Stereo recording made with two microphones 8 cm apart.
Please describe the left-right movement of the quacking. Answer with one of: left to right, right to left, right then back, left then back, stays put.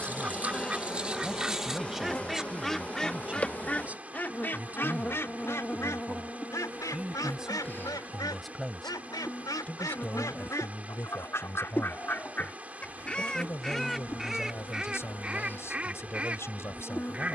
left then back.